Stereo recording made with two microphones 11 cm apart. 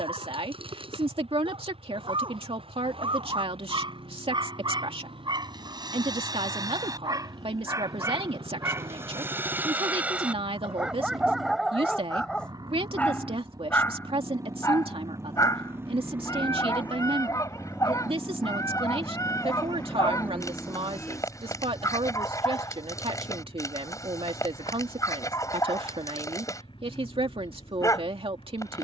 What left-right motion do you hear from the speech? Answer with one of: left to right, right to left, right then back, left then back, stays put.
stays put.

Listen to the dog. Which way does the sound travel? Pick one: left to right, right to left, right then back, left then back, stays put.
right to left.